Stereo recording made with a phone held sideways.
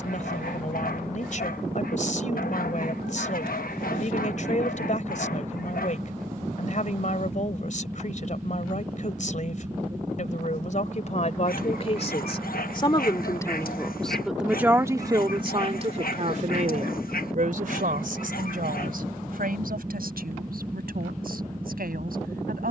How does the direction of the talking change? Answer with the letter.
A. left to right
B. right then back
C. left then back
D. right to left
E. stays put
A.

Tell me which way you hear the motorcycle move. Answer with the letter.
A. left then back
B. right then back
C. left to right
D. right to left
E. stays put
E.